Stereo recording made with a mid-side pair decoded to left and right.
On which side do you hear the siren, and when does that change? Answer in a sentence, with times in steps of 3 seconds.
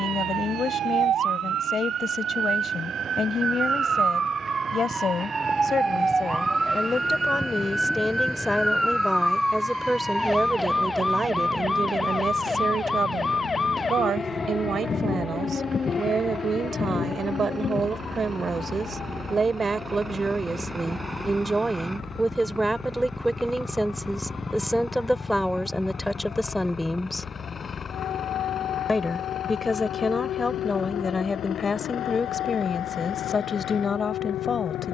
In this clip you hear the siren on the right from 0 s, in the centre from 6 s and on the left from 12 s.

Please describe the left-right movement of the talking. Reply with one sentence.
You can hear the talking move from left to right and back again.